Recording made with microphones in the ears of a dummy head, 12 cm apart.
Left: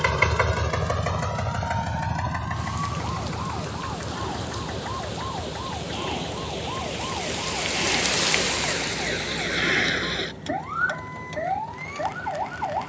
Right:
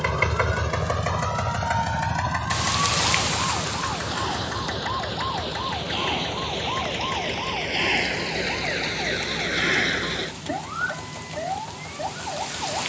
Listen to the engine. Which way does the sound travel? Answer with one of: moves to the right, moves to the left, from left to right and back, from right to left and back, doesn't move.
moves to the right.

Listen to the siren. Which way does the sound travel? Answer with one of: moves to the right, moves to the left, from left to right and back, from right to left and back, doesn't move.
moves to the left.